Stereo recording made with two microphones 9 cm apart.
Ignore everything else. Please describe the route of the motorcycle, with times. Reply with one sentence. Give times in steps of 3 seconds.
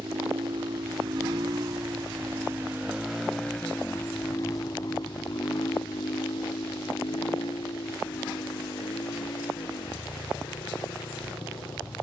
In this clip you hear the motorcycle on the right from 0 s and on the left from 3 s.